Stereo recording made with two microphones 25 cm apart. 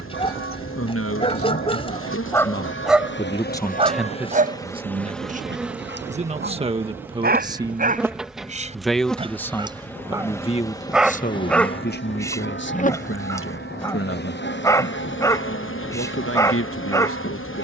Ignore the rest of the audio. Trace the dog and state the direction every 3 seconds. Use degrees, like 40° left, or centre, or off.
20° left, 30° right, 40° right, 10° right, 10° left, 10° left.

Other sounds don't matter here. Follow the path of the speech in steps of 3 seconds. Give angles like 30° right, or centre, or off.
60° left, 10° right, 20° right, 20° left, 50° left, 60° left.